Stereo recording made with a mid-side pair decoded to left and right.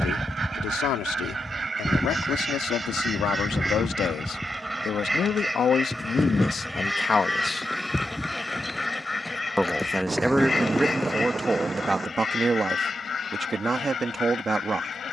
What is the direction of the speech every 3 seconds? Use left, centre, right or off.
left, left, left, centre, right.